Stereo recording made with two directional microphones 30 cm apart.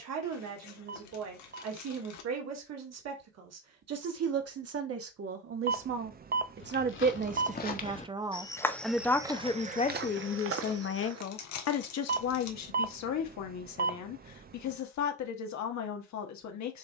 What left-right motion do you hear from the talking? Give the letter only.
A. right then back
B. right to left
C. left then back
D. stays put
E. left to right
B.